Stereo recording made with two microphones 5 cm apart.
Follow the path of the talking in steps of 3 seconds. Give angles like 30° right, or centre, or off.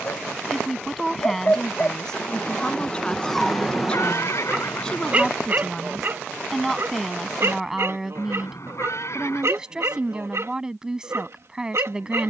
10° left, 10° left, centre, 10° right.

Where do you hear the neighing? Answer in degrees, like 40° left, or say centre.
60° left.